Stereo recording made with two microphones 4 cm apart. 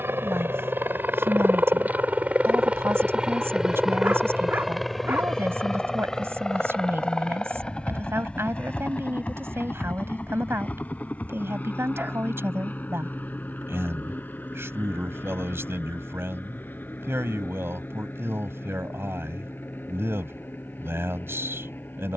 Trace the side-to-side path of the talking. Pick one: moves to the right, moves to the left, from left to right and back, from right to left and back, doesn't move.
doesn't move.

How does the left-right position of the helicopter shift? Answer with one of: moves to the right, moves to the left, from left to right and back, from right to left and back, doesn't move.
moves to the left.